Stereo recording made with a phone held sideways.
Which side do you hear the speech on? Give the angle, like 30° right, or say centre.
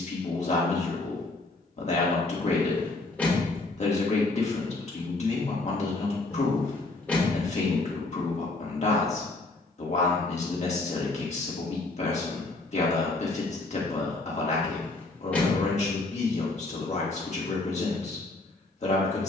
50° left.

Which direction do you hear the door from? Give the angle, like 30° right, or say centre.
10° left.